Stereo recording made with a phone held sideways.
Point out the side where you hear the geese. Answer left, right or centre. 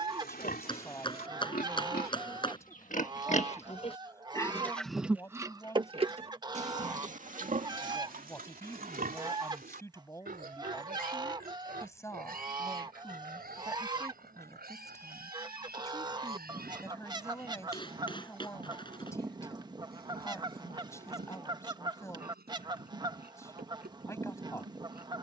right.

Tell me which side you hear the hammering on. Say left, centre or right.
left.